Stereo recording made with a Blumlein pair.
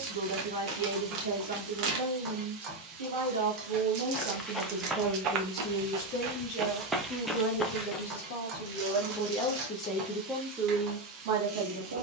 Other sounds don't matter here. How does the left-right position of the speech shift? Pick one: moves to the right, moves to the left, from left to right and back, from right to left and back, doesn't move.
from right to left and back.